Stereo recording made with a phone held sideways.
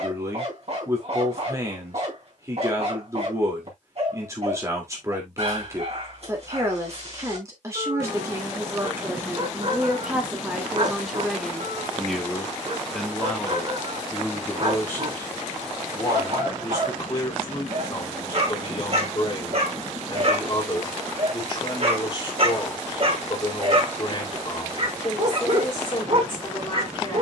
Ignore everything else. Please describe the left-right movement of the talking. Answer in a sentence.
In this clip you hear the talking move from right to left.